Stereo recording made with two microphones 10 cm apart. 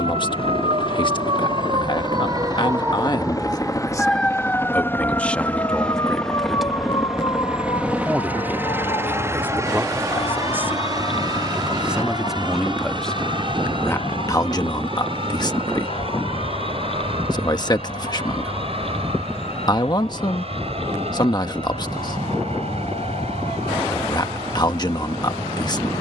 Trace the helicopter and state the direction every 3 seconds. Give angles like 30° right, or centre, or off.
50° left, 20° left, 10° right, 30° right, 50° right, 50° right, 60° right, 60° right, 70° right.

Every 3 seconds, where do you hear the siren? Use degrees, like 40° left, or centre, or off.
50° right, 10° left, 40° left, 50° left, 60° left, 60° left, 60° left, 60° left, off.